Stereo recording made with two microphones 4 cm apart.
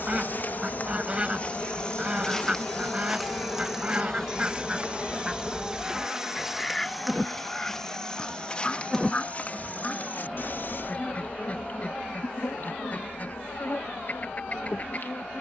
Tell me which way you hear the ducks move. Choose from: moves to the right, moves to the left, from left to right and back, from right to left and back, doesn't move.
moves to the left.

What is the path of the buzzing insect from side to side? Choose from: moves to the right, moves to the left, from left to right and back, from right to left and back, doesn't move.
from left to right and back.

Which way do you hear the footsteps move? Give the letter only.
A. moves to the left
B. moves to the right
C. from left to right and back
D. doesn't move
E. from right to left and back
C.